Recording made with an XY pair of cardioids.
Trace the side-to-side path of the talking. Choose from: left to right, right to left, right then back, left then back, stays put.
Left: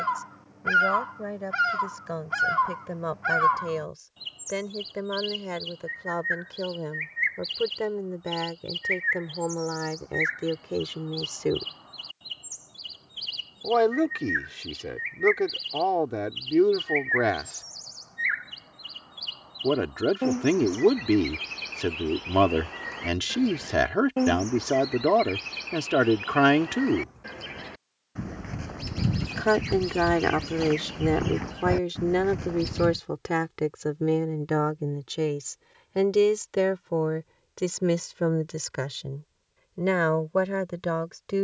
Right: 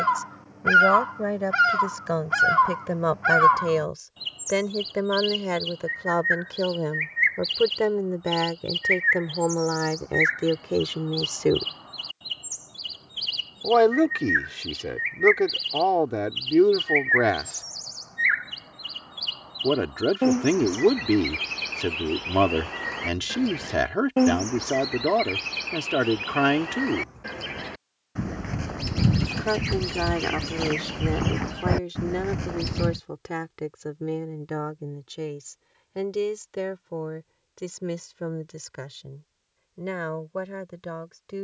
right to left.